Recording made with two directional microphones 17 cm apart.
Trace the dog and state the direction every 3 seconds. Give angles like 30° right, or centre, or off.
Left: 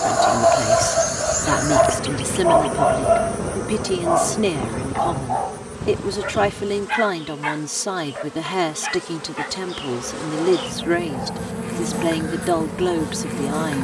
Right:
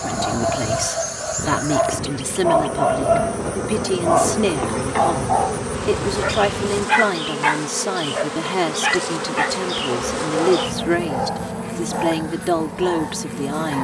30° left, 10° right, 30° right, 50° right, 50° right.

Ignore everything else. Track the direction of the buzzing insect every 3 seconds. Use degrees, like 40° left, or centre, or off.
20° left, 20° right, 60° right, 20° right, 20° left.